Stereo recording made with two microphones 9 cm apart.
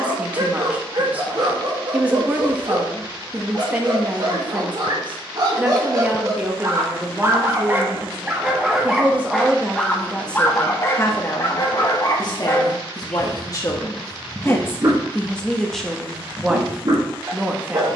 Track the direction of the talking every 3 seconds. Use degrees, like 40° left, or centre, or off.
10° right, 10° right, 10° right, 10° left, 40° left, centre.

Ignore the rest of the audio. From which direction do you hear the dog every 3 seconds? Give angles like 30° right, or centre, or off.
50° right, 50° right, 20° right, 20° left, centre, 50° right.